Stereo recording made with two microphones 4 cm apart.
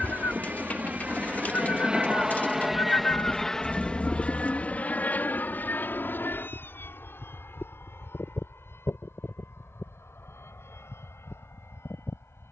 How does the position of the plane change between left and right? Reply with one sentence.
In this clip you hear the plane travel towards the left.